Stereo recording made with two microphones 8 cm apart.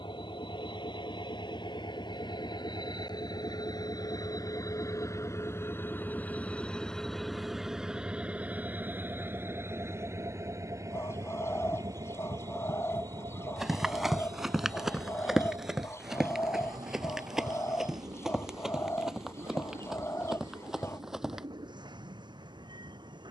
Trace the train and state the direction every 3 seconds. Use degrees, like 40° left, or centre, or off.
70° left, 50° left, centre, 40° right, 50° right, 60° right, 60° right, 60° right.